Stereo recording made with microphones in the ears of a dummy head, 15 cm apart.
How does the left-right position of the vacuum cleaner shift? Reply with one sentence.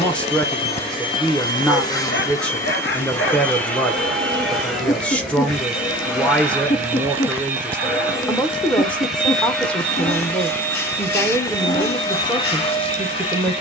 You can hear the vacuum cleaner go right and come back.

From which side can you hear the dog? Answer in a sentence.
You can hear the dog on the left.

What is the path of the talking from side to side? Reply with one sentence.
In this clip you hear the talking stay put.